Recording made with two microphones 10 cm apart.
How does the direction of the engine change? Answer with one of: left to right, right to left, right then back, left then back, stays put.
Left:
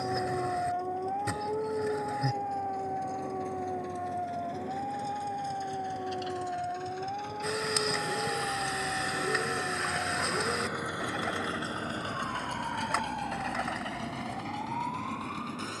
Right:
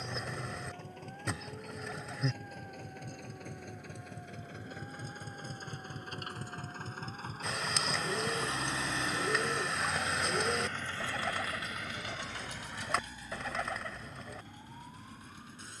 right to left.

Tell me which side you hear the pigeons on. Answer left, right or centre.
centre.